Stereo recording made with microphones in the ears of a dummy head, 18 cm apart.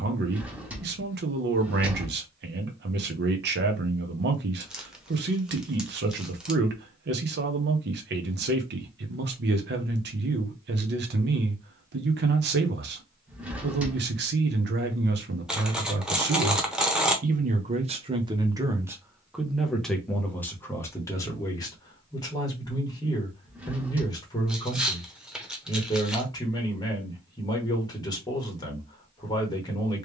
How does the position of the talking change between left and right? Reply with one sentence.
You can hear the talking move from right to left.